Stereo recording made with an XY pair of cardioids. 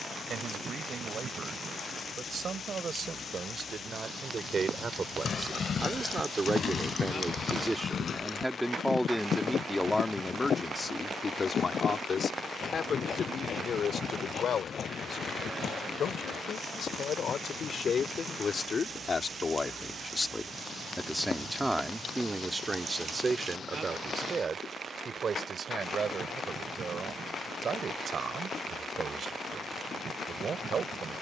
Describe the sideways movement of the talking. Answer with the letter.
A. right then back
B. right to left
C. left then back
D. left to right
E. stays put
C.